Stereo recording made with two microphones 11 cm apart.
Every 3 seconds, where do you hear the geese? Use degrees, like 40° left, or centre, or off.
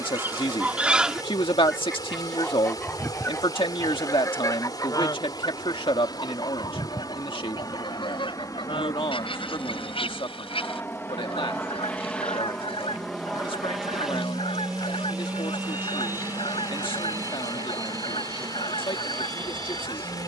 centre, 30° left, 50° left, 50° left, 60° left, 60° left, 60° left.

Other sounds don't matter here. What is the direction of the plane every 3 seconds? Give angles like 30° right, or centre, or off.
50° left, 40° left, 30° left, 20° left, centre, 20° right, 40° right.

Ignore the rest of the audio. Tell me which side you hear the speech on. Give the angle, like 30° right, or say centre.
50° left.